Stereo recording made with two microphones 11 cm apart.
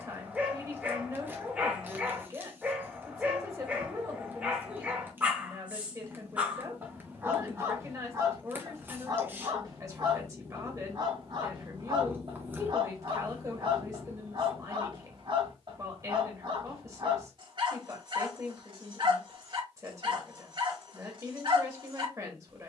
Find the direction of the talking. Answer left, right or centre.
right.